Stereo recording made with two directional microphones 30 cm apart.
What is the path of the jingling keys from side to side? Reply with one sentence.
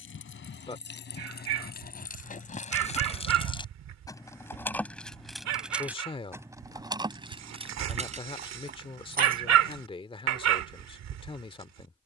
You can hear the jingling keys go from the left side to the right.